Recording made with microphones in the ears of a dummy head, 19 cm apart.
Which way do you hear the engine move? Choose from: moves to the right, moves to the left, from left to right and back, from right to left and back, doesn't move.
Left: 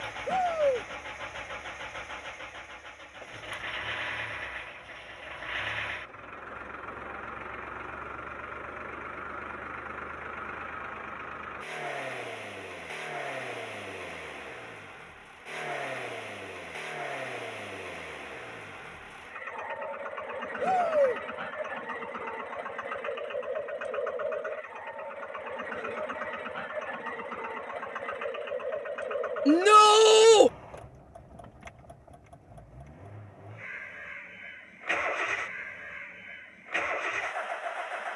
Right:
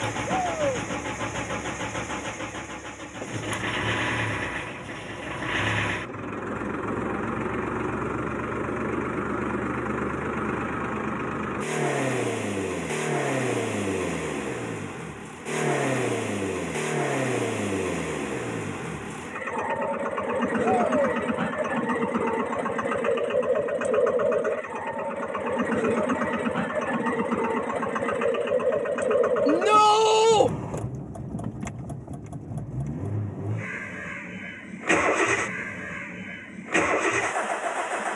doesn't move.